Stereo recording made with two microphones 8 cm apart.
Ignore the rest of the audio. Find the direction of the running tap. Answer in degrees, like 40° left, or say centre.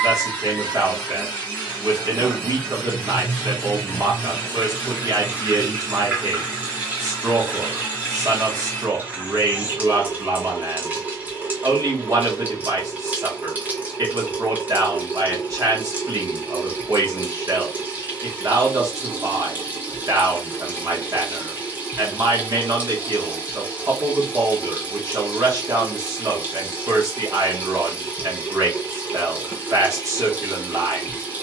20° right.